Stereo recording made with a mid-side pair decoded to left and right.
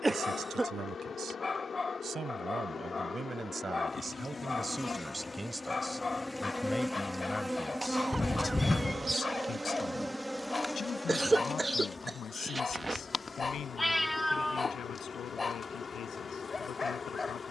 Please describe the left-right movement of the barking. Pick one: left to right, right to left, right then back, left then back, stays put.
stays put.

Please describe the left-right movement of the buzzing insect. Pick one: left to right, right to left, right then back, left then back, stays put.
right then back.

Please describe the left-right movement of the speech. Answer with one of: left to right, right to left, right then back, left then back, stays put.
right to left.